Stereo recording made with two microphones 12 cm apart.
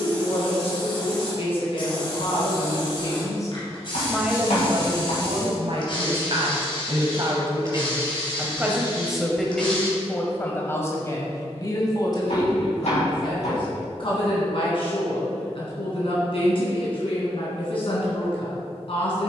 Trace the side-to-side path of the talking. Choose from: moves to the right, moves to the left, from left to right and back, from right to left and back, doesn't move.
from left to right and back.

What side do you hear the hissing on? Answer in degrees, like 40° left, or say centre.
50° left.